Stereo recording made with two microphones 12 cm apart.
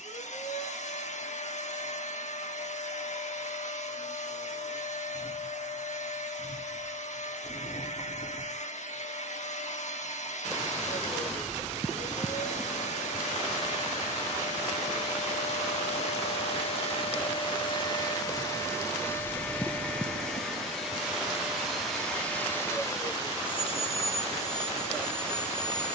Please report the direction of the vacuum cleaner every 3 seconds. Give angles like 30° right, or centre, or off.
70° left, 70° left, 70° left, 70° left, 70° left, 50° left, 10° left, 10° left, 60° left.